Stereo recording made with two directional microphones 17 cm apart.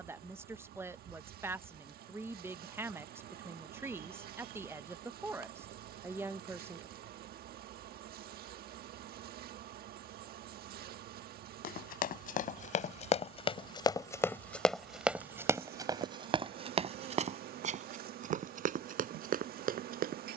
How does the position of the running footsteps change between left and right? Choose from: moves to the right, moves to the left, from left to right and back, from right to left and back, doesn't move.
moves to the right.